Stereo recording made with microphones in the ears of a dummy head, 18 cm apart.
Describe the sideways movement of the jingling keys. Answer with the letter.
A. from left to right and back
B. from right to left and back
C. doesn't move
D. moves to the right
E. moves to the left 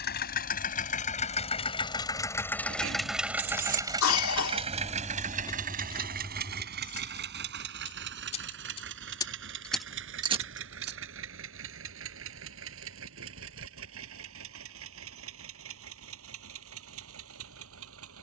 B.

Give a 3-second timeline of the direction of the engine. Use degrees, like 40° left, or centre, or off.
30° left, 30° right, 50° right, 70° right, 70° right, 70° right.